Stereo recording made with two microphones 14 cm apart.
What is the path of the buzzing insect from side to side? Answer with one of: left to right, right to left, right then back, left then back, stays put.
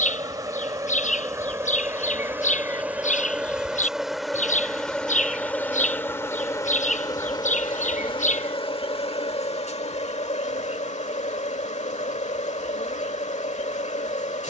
right to left.